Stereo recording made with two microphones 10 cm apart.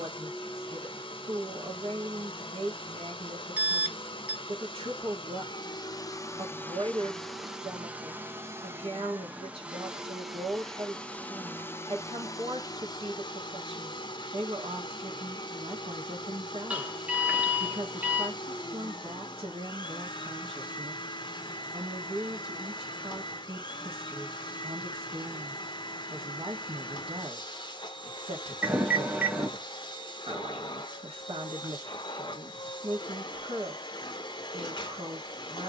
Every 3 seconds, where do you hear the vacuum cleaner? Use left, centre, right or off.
left, left, centre, centre, left, left, left, left, left, left, left, left.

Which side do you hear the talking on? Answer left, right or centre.
right.